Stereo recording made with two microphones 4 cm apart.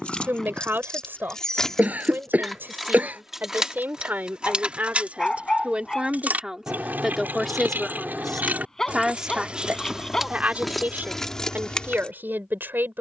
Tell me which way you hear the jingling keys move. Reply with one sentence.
You can hear the jingling keys move from left to right and back again.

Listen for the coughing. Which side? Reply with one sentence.
You can hear the coughing on the right.